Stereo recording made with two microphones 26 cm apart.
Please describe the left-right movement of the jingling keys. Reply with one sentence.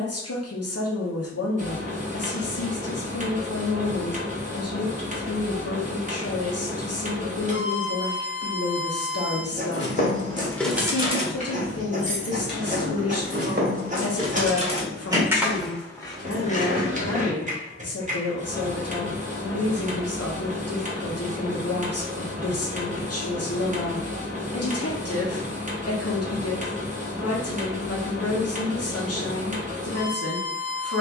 In this clip you hear the jingling keys go right and come back.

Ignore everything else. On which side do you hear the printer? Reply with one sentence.
In this clip you hear the printer on the right.